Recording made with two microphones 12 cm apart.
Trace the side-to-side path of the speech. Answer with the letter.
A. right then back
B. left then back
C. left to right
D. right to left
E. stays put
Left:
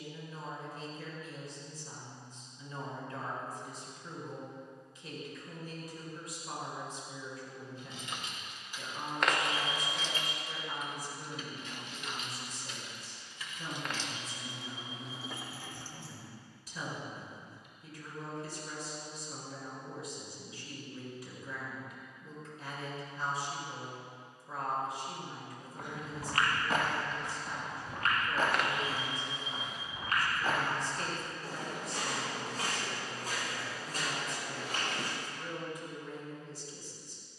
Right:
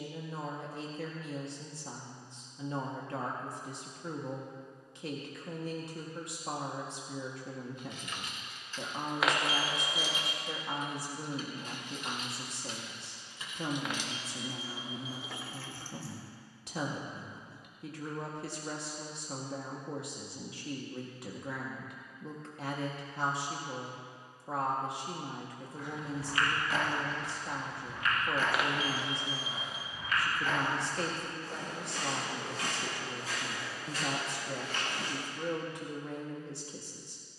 E.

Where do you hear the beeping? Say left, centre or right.
centre.